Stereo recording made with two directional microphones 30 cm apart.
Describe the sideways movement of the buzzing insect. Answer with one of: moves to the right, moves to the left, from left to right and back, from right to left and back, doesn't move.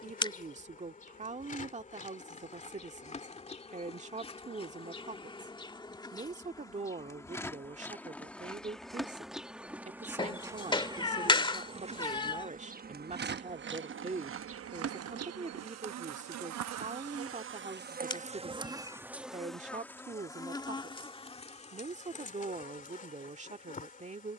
from left to right and back.